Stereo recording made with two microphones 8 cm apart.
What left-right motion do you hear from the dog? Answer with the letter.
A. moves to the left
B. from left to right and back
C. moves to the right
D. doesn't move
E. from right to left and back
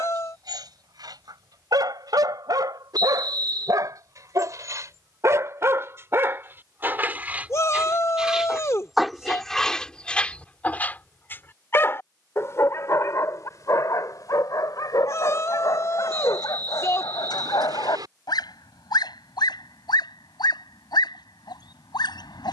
A.